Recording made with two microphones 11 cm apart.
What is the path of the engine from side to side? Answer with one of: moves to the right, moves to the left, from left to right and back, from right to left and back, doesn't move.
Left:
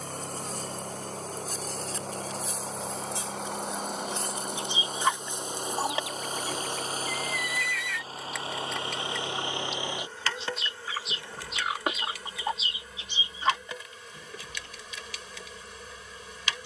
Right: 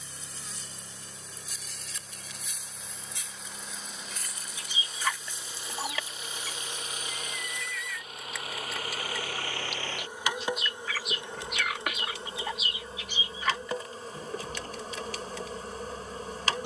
moves to the right.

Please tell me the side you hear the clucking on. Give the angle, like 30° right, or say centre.
30° left.